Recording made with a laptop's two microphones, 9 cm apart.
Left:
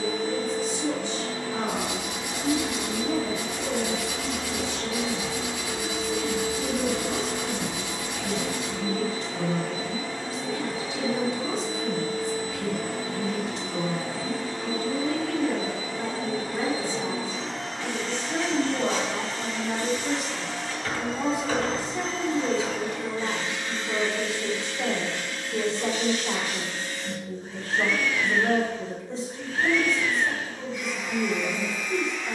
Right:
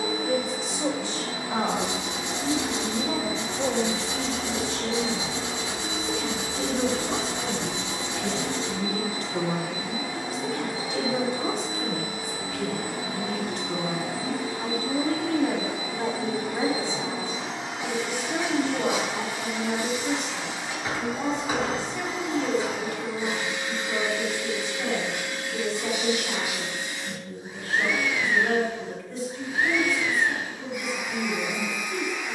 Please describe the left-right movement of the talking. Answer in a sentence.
You can hear the talking move from right to left.